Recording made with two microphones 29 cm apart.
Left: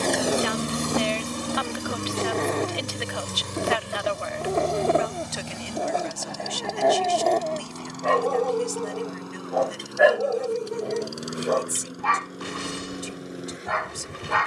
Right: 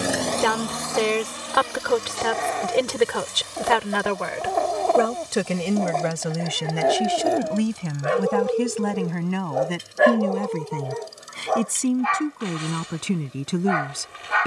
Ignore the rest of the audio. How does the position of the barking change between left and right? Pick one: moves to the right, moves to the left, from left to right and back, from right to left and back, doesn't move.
from left to right and back.